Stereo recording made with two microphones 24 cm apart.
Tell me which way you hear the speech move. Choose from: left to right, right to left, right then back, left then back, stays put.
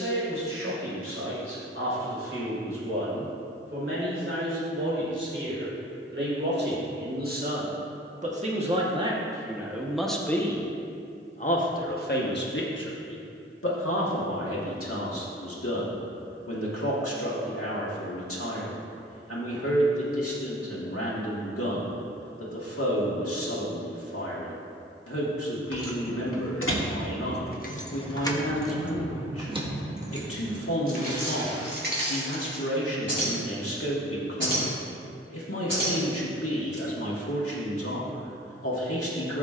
right to left.